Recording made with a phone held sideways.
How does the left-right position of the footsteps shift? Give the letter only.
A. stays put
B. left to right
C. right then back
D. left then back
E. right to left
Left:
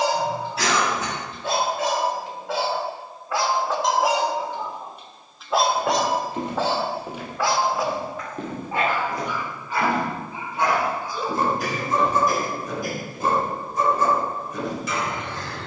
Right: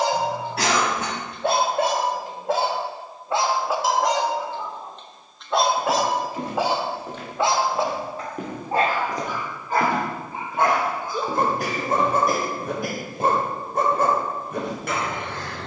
B.